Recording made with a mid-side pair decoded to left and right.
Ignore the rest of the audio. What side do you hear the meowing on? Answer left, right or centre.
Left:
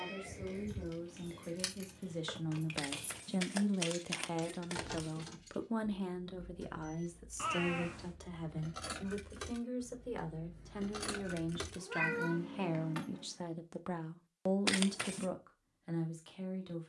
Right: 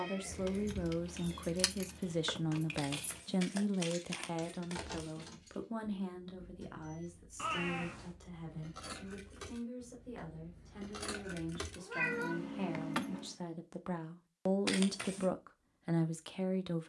centre.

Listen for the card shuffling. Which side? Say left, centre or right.
left.